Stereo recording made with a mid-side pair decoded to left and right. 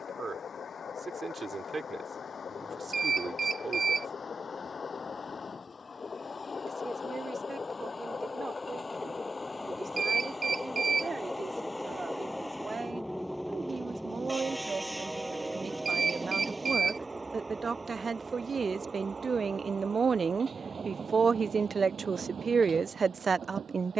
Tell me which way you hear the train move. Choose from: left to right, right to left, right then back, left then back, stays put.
left to right.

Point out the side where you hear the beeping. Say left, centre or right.
right.